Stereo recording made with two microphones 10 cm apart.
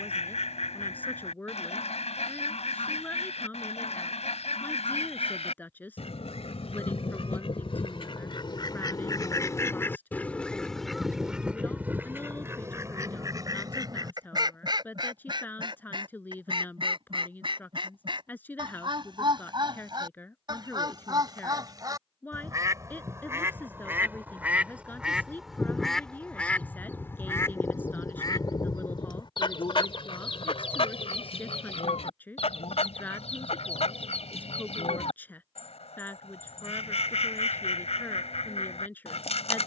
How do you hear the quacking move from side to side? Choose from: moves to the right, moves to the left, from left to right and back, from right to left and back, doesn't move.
from left to right and back.